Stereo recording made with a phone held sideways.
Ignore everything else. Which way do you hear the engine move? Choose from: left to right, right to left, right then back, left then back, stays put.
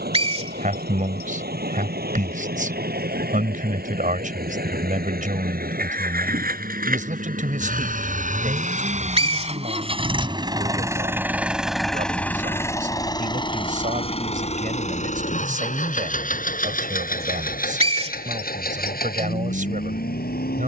right to left.